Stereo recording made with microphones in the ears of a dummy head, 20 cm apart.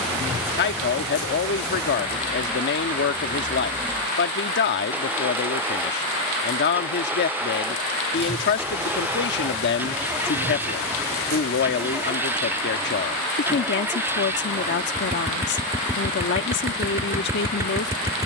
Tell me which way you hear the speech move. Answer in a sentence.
In this clip you hear the speech stay put.